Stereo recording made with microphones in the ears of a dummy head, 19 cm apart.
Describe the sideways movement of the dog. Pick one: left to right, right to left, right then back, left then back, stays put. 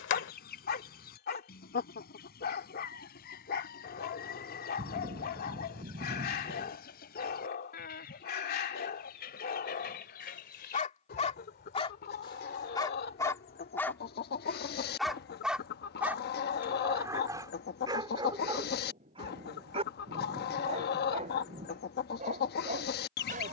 left to right.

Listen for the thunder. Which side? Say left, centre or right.
right.